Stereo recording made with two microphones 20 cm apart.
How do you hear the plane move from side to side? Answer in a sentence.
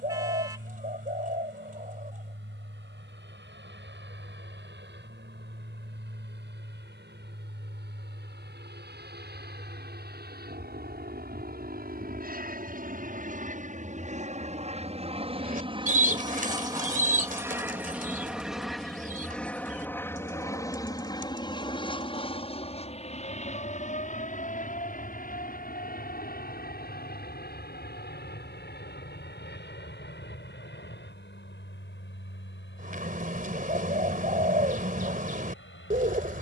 In this clip you hear the plane travel towards the left.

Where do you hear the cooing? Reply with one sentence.
In this clip you hear the cooing on the right.